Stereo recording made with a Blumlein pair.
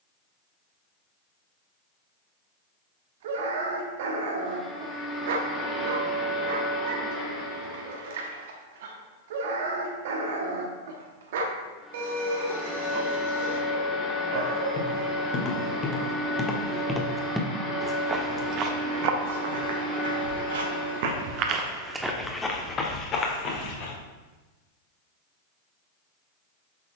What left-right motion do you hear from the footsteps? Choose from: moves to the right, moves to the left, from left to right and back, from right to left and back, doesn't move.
from left to right and back.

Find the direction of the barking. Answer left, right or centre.
right.